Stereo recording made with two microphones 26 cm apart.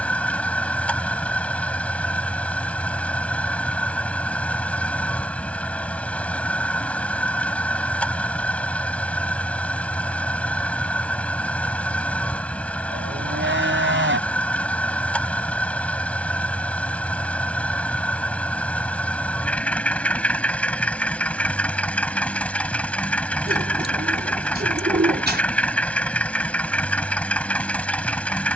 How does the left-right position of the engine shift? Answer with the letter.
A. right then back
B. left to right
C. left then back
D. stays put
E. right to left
D.